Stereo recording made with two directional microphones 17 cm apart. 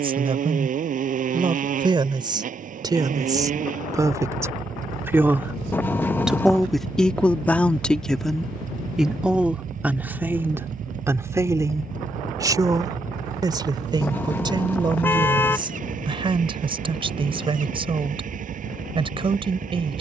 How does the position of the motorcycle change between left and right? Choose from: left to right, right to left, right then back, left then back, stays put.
stays put.